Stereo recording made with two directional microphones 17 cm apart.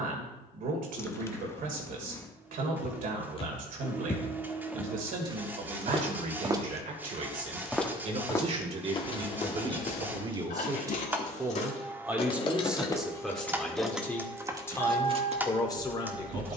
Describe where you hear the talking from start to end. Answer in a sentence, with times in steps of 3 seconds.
You can hear the talking on the right from 0 s, in the centre from 12 s and on the left from 15 s.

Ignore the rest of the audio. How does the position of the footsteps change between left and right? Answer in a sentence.
You can hear the footsteps go right and come back.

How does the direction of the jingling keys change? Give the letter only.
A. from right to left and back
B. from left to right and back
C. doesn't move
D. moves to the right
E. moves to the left
D.